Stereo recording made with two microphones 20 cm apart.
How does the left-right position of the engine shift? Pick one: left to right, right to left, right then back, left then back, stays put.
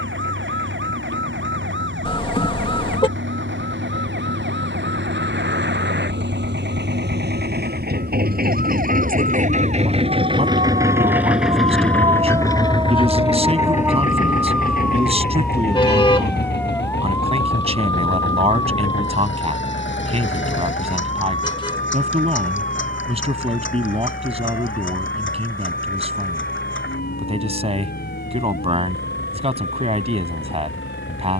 right to left.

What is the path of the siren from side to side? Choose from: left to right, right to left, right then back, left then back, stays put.
right to left.